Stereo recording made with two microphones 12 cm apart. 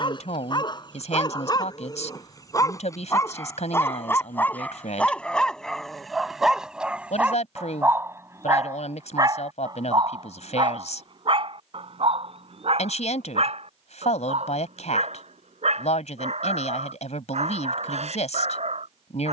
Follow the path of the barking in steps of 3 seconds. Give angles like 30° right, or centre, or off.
30° left, 10° left, 10° right, 40° right, 60° right, 70° right, 70° right.